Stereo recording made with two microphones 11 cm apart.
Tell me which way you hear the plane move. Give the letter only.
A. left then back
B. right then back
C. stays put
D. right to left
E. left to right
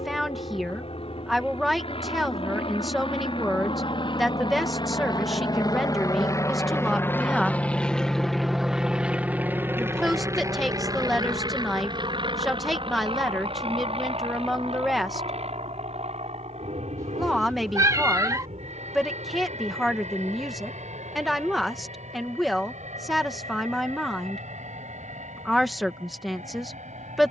E.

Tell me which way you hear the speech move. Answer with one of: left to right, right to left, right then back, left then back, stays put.
stays put.